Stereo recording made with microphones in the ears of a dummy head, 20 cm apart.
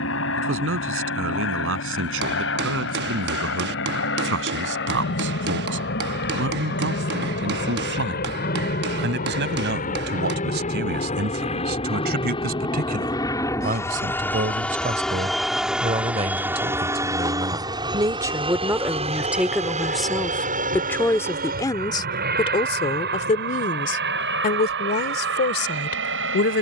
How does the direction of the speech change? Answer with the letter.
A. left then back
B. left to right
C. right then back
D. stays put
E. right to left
E.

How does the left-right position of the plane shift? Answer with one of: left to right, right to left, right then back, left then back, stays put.
left to right.